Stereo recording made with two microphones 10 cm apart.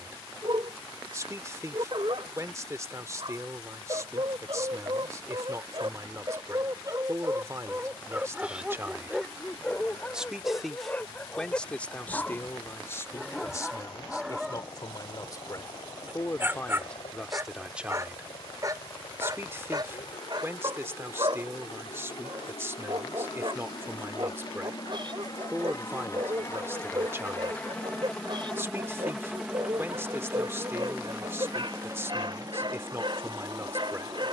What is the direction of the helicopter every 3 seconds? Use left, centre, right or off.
left, left, left, left, left, left, left, left, left, centre, right, right.